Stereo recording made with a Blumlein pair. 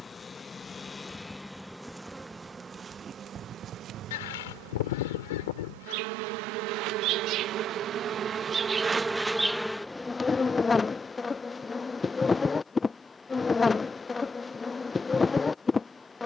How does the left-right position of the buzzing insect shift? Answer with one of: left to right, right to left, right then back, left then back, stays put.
right then back.